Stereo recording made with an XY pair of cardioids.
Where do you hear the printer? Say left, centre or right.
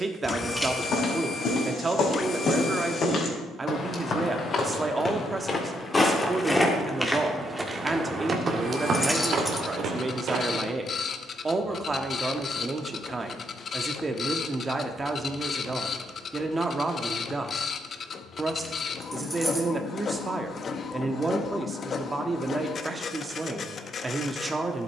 left.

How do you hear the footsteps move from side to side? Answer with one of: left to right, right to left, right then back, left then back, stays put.
left to right.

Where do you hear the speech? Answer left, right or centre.
right.